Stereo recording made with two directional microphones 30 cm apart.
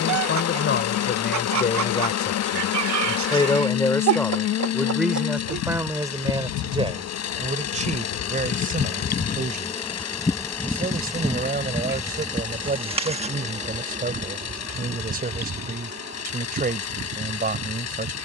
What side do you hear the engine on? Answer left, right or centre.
left.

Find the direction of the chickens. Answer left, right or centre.
right.